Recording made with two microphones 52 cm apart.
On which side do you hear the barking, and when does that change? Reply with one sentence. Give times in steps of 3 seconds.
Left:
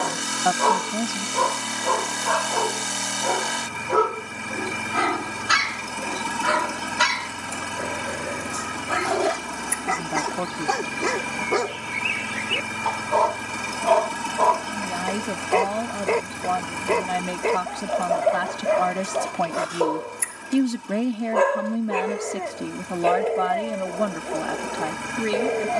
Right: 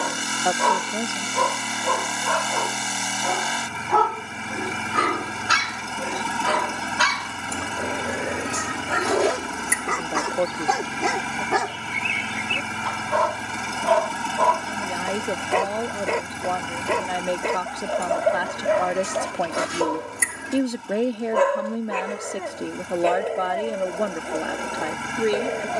You can hear the barking on the right from 0 s, in the centre from 3 s, on the left from 6 s, in the centre from 9 s and on the right from 12 s.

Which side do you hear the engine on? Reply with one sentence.
In this clip you hear the engine in the centre.